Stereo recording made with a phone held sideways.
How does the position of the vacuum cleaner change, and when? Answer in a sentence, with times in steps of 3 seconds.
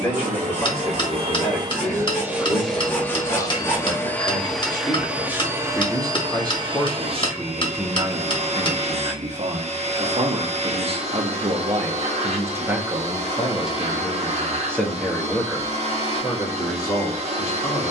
In this clip you hear the vacuum cleaner on the right from 0 s, in the centre from 3 s and on the right from 6 s.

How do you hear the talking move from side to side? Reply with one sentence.
In this clip you hear the talking go right and come back.